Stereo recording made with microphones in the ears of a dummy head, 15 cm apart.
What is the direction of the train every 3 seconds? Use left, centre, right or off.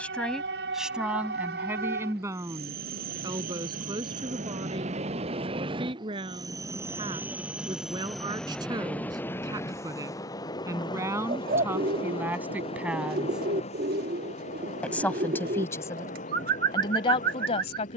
right, right, centre, left, left, left.